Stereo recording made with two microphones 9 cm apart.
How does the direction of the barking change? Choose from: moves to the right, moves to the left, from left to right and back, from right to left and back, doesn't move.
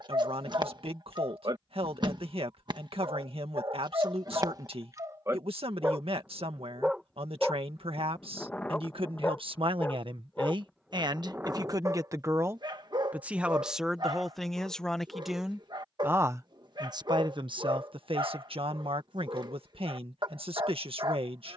from right to left and back.